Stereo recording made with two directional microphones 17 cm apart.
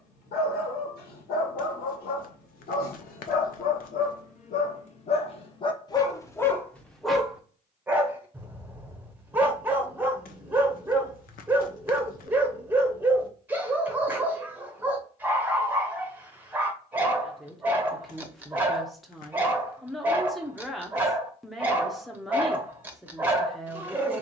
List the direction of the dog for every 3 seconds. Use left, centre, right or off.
left, left, centre, centre, centre, centre, centre, centre.